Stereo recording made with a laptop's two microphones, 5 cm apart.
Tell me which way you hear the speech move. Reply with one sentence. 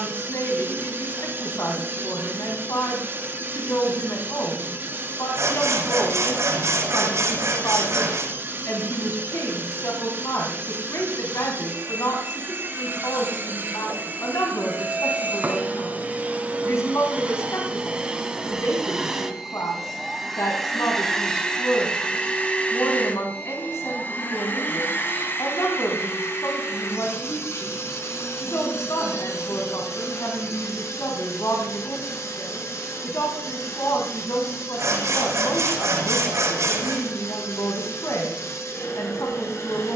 You can hear the speech stay put.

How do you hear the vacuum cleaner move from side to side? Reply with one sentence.
In this clip you hear the vacuum cleaner go from the right side to the left.